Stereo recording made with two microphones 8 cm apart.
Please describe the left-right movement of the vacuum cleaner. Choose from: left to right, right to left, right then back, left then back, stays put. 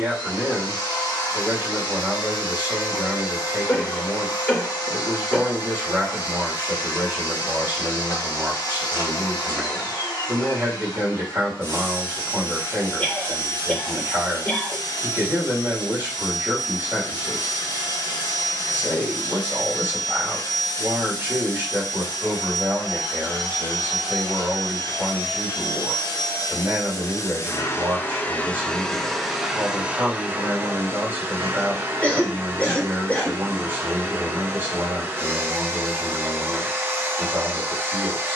left to right.